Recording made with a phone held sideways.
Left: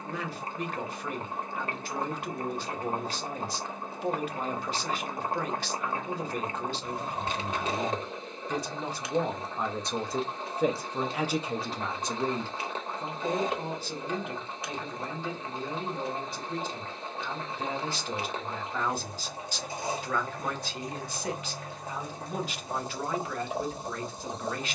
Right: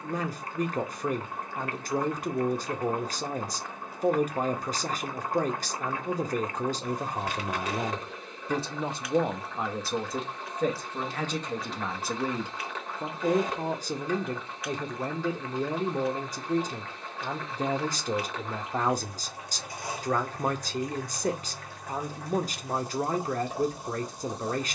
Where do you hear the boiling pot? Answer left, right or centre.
left.